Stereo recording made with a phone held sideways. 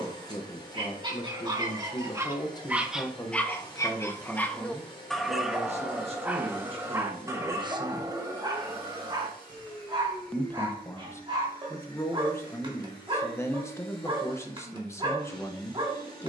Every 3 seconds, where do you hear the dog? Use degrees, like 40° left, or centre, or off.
20° right, 10° left, 20° right, 30° right, 30° right, 30° right.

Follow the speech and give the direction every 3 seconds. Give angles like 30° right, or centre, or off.
30° left, 20° right, 30° right, 10° left, 20° left, 20° left.